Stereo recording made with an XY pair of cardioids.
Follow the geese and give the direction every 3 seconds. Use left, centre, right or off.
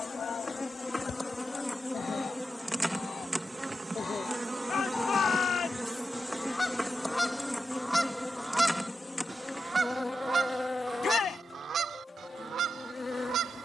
left, left, centre, right, right.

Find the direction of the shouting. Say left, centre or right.
left.